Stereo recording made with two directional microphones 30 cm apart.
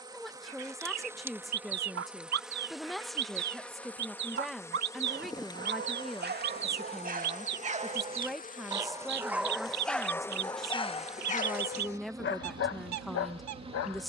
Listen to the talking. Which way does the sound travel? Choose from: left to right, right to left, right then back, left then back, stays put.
stays put.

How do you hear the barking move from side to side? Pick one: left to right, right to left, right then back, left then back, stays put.
right to left.